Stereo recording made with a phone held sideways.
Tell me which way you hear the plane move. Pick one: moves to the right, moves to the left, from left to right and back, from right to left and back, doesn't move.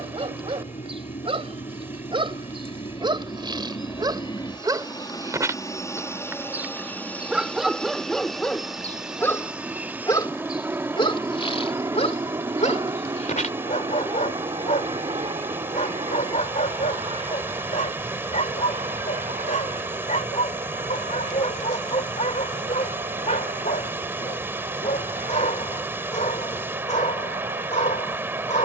moves to the right.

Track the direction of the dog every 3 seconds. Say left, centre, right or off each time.
right, right, centre, left, left, left, left, left, left, left.